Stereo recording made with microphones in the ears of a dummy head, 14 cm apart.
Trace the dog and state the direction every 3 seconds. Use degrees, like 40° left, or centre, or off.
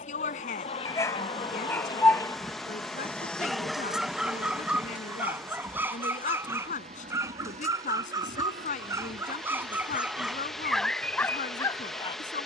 20° left, 10° right, 20° right, centre.